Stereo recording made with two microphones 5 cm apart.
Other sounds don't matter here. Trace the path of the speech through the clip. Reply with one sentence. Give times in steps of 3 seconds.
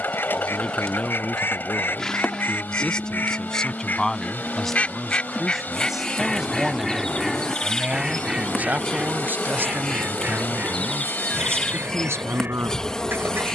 You can hear the speech on the left from 0 s, in the centre from 3 s and on the right from 6 s.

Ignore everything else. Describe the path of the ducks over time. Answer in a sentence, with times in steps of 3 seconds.
In this clip you hear the ducks on the left from 0 s, in the centre from 6 s and on the right from 9 s.